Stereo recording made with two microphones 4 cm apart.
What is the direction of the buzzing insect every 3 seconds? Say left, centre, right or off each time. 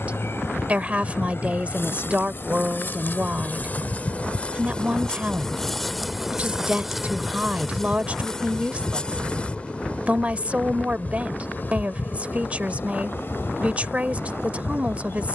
left, left, centre, left, left.